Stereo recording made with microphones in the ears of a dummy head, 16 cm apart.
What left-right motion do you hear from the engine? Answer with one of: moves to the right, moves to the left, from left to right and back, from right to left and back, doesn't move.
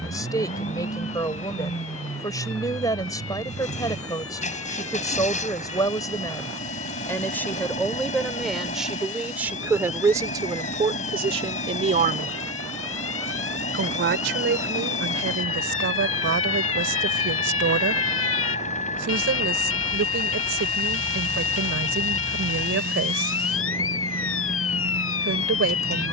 doesn't move.